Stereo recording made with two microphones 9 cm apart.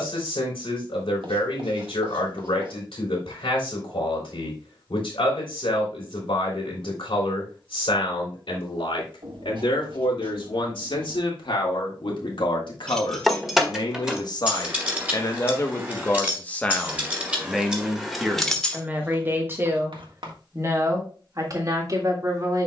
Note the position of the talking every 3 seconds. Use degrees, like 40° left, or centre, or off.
80° left, 80° left, 80° left, 80° left, 60° left, 20° left, 30° right, 40° right.